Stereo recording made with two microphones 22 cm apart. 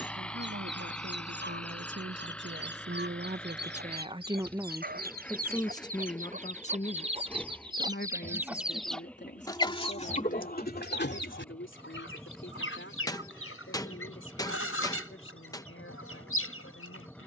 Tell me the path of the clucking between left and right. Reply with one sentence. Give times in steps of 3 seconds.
In this clip you hear the clucking on the right from 0 s and on the left from 9 s.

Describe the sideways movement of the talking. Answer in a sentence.
In this clip you hear the talking move from right to left.